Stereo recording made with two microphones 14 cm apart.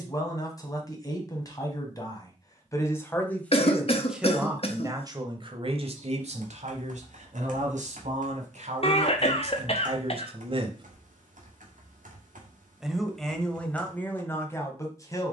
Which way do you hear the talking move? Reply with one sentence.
You can hear the talking go right and come back.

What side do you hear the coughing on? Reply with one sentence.
In this clip you hear the coughing on the left.